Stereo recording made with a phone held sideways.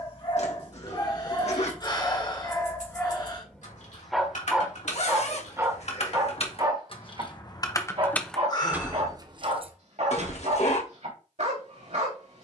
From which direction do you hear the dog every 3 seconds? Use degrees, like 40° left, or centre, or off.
30° left, centre, 40° right, 60° right.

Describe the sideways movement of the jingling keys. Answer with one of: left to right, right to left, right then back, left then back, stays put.
left to right.